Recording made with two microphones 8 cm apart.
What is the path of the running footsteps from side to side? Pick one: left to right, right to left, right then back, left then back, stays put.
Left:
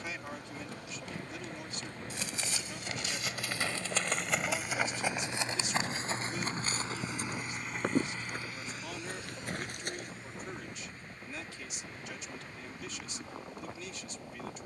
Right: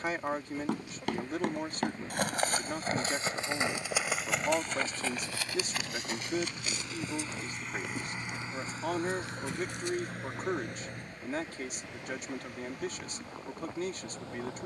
right to left.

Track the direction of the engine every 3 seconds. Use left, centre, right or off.
left, left, centre, right, right.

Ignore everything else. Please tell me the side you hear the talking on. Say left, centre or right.
right.